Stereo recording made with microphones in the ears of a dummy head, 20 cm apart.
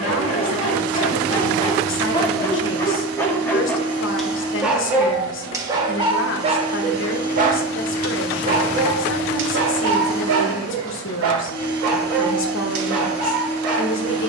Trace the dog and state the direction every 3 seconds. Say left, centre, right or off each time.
left, centre, right, right, right.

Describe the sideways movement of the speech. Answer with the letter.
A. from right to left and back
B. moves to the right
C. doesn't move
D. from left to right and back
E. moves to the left
C.